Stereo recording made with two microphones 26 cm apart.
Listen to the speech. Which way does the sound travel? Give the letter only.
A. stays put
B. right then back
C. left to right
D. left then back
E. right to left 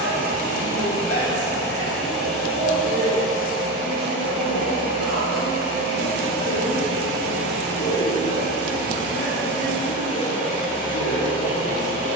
A.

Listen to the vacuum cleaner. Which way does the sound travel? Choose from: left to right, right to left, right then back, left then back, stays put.
right then back.